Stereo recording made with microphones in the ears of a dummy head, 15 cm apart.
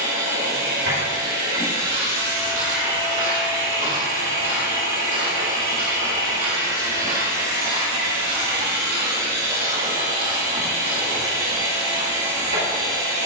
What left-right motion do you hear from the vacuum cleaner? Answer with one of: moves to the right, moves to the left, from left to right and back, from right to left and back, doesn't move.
doesn't move.